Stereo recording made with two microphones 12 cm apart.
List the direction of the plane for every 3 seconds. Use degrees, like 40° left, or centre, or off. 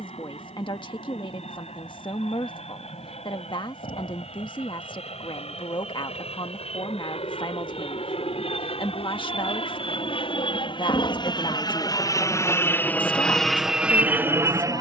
70° left, 70° left, 60° left, 50° left, centre.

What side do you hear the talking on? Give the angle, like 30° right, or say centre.
40° left.